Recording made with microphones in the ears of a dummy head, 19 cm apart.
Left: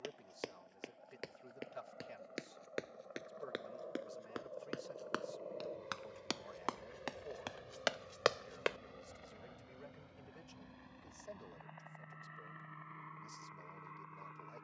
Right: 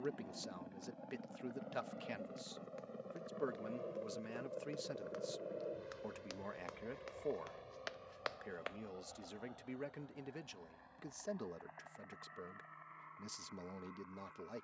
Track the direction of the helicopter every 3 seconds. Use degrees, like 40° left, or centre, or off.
60° right, 30° right, 10° left, 40° left, 50° left.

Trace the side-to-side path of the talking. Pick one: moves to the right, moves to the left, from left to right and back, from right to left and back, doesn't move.
doesn't move.